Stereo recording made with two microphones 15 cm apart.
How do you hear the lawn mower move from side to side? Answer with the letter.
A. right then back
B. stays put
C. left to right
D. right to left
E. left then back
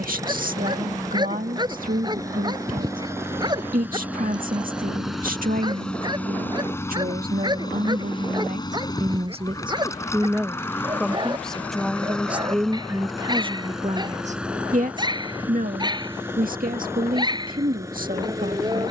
E.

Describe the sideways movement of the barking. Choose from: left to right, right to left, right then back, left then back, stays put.
stays put.